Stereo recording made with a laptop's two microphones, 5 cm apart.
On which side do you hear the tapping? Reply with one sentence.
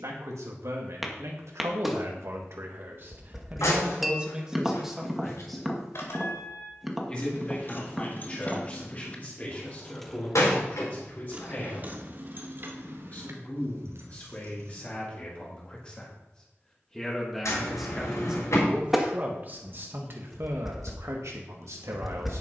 You can hear the tapping in the centre.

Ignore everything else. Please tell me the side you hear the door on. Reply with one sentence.
In this clip you hear the door on the left.